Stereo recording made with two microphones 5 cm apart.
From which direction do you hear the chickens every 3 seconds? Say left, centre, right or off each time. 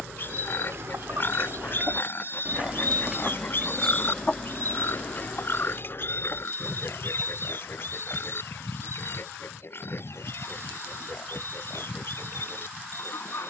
right, left, left, left, left.